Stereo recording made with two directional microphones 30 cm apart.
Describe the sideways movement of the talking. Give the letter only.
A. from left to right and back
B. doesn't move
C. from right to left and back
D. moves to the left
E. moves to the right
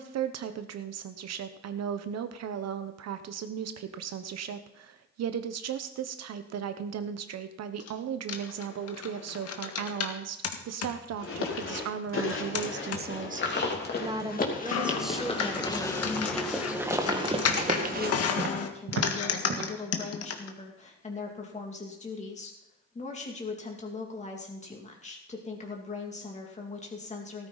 D.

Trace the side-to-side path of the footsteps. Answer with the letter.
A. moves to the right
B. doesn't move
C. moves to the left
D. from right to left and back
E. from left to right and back
A.